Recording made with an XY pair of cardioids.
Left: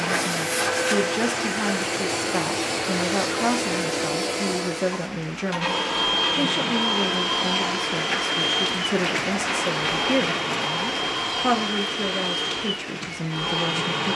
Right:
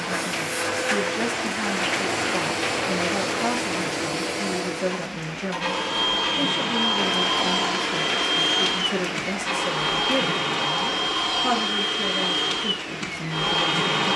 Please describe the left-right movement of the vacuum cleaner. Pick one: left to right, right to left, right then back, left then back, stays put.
left to right.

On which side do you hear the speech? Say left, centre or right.
left.